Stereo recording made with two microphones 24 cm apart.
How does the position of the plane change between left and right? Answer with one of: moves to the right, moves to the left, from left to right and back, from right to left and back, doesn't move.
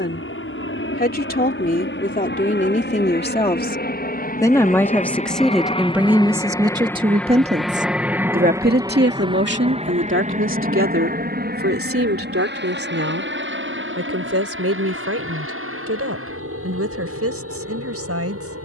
moves to the right.